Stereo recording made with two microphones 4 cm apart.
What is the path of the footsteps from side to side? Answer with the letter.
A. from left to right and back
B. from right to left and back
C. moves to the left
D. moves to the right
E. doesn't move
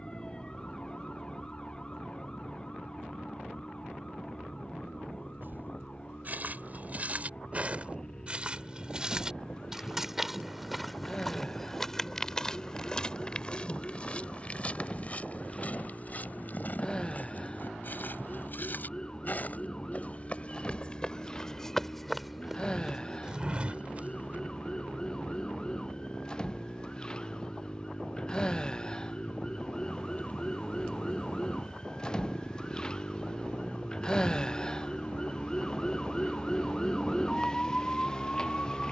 B.